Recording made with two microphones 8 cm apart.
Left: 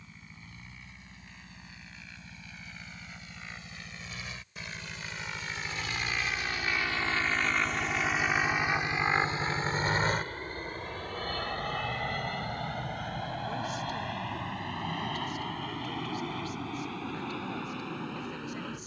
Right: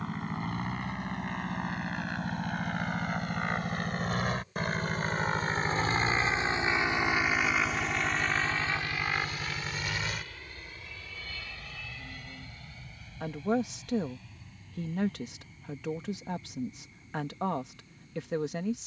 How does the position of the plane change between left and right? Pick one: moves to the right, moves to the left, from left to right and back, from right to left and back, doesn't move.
moves to the left.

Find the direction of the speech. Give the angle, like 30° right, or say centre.
80° right.